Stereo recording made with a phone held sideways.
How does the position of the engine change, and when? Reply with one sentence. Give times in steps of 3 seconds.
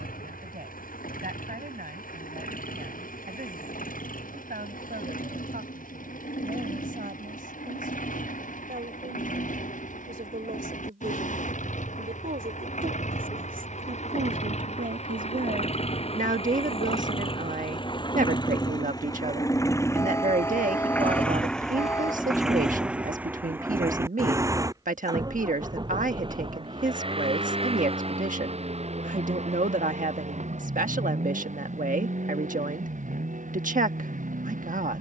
In this clip you hear the engine on the left from 0 s, in the centre from 21 s and on the right from 24 s.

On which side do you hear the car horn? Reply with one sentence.
You can hear the car horn on the left.